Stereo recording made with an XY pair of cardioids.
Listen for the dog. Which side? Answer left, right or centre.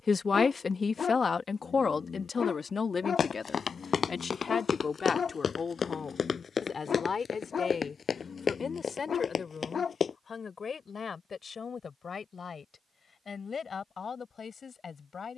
left.